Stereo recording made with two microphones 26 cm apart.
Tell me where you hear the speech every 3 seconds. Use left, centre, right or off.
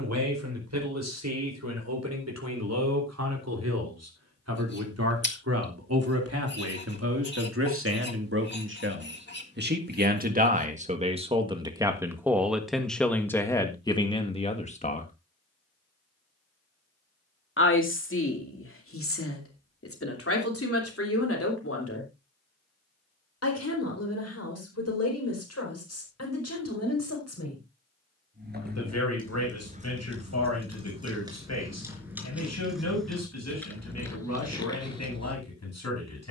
right, right, right, right, centre, left, left, left, left, left, left, left.